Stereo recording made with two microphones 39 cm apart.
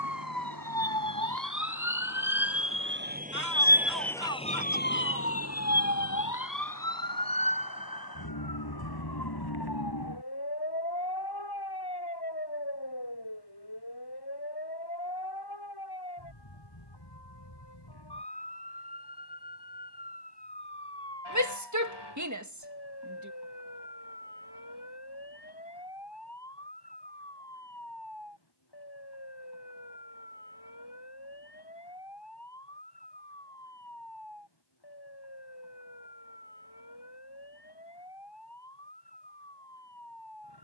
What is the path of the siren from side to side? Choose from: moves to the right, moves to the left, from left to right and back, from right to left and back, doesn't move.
moves to the left.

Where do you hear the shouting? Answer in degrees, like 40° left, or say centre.
50° right.